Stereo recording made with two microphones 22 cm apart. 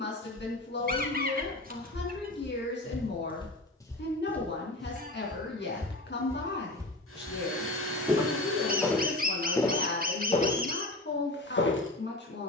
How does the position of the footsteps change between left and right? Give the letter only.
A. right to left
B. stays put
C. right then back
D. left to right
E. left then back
C.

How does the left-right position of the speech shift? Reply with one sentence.
In this clip you hear the speech stay put.